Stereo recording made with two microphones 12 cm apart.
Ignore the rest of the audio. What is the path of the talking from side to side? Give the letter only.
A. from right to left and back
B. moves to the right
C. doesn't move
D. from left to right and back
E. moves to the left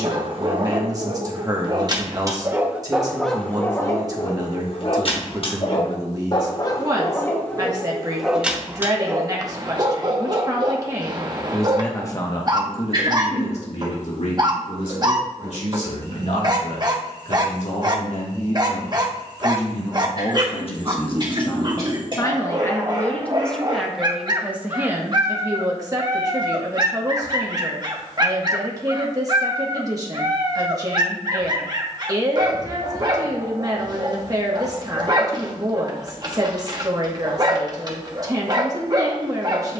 A.